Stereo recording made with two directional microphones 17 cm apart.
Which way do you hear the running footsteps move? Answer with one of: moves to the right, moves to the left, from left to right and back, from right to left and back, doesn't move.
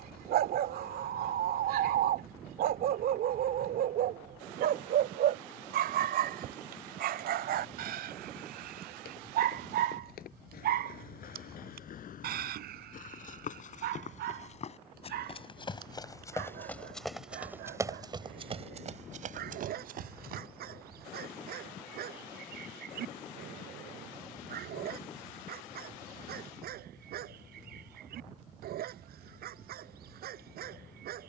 moves to the right.